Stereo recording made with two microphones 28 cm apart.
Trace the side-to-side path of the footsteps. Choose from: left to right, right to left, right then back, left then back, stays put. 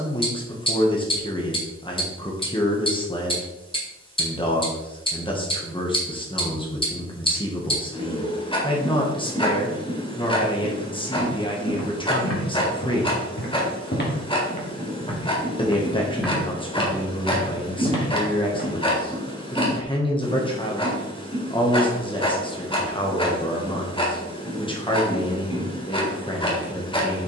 left to right.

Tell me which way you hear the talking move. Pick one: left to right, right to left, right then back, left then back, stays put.
stays put.